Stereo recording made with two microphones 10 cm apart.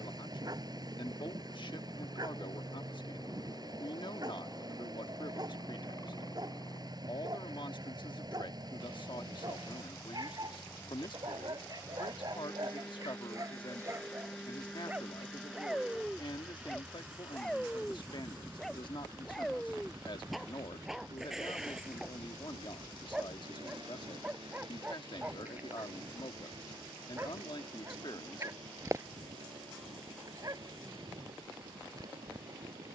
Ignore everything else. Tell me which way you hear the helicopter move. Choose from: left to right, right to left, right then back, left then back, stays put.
left to right.